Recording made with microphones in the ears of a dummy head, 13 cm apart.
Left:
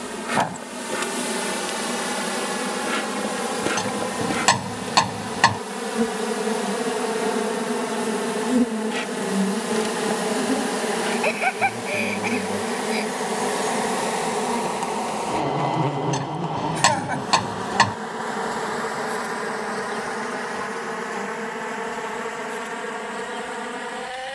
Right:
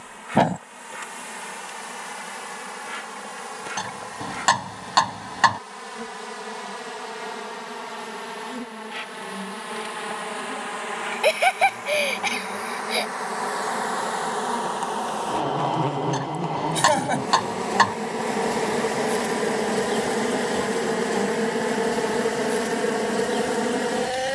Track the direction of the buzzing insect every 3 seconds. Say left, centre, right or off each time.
left, left, left, left, left, centre, right, right.